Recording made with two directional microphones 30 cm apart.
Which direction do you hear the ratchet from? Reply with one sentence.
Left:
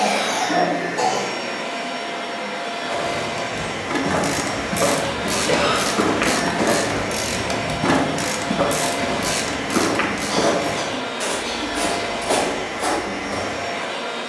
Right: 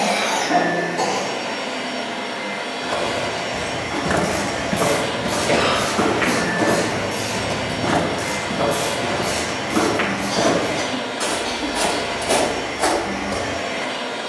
You can hear the ratchet on the left.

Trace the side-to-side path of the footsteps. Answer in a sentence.
In this clip you hear the footsteps go left and come back.